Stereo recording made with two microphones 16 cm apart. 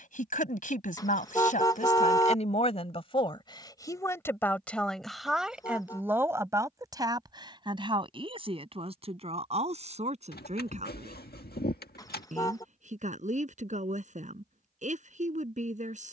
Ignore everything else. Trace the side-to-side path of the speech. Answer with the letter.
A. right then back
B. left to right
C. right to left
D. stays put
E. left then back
B.